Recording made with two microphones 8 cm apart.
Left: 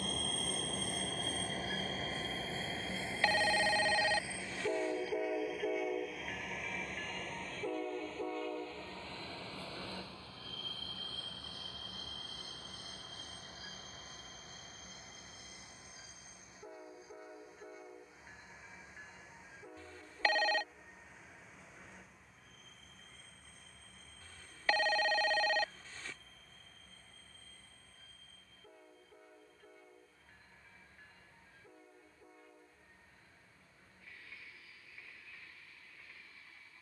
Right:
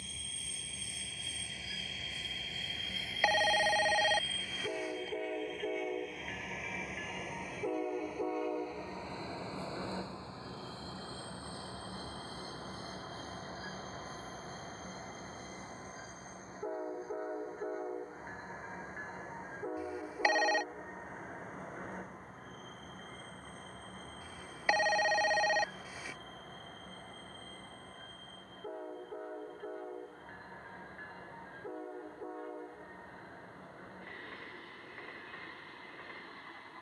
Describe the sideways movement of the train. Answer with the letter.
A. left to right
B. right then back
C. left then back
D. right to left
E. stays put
A.